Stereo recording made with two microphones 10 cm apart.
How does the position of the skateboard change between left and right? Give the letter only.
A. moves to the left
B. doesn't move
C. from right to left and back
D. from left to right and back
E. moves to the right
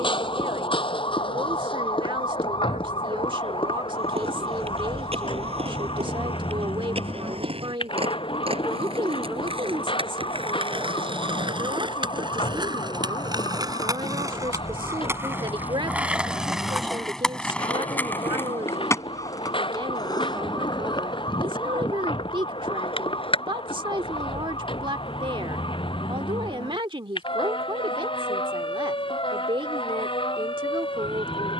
A.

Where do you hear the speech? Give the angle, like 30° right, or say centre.
50° right.